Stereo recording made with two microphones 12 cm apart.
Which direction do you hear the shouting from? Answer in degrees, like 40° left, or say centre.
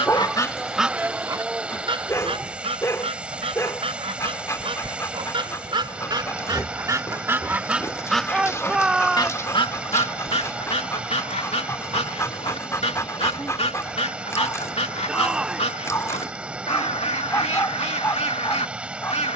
10° right.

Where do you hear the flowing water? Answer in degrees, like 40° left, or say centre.
10° right.